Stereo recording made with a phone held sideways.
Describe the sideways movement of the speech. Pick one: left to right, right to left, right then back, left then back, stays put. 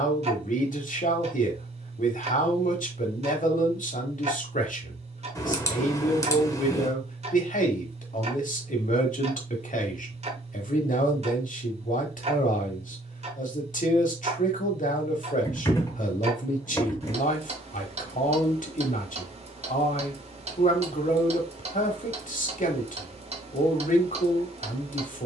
stays put.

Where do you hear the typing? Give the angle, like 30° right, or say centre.
20° left.